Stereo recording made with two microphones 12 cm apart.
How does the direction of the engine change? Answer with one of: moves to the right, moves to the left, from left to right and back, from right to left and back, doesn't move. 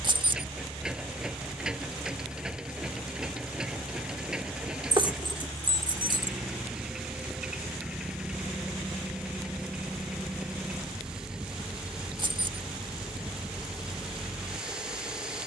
doesn't move.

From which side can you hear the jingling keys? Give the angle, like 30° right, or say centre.
40° right.